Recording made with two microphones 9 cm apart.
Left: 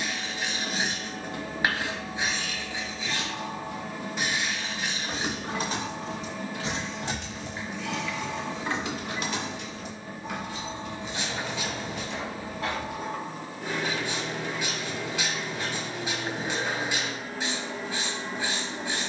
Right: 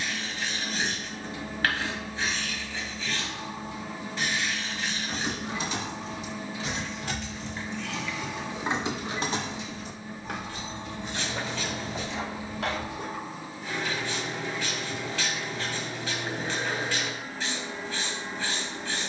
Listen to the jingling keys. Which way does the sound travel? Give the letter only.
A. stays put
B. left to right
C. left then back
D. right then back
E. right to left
B.